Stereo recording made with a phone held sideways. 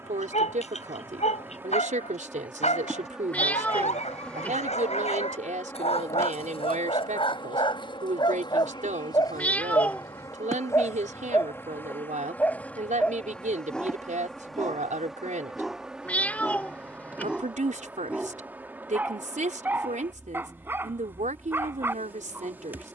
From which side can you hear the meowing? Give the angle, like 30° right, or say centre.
10° left.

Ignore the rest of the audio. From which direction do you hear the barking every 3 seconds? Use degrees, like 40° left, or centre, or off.
50° left, 50° left, 40° left, 20° left, 10° left, centre, 10° right, 10° right.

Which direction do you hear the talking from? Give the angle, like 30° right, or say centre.
60° right.